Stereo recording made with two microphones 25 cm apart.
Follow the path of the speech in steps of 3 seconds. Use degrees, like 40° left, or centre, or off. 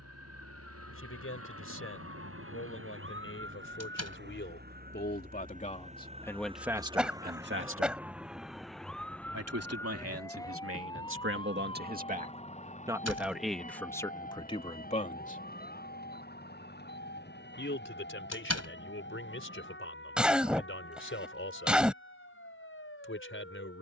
60° left, 40° left, 20° right, 60° right, centre, 40° left, 50° left, 50° left.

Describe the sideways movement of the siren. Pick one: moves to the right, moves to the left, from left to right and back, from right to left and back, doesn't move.
moves to the left.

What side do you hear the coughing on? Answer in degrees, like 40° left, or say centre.
centre.